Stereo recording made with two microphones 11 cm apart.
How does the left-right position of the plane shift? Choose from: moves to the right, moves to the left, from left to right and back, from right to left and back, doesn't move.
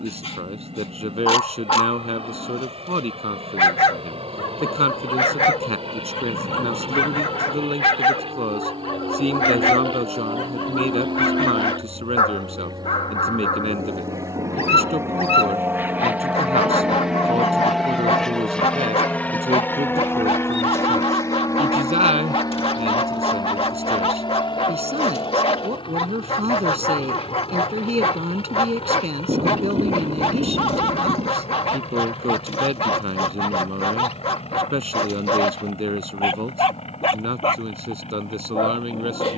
moves to the left.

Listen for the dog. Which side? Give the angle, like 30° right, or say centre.
60° left.